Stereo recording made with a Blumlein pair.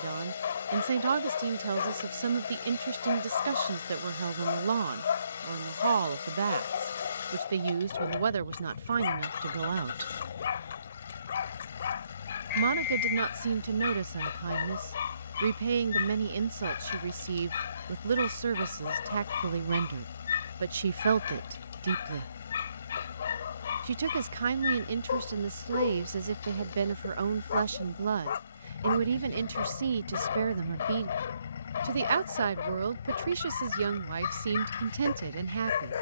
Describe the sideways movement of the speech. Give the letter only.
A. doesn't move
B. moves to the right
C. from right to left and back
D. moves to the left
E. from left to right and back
A.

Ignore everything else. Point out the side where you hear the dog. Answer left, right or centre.
left.